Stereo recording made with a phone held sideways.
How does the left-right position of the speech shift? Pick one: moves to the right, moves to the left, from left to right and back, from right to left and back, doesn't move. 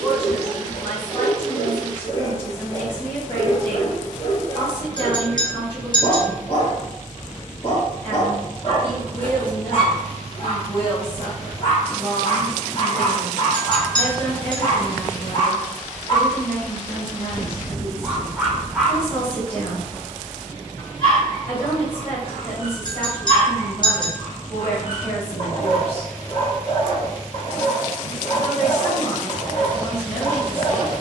doesn't move.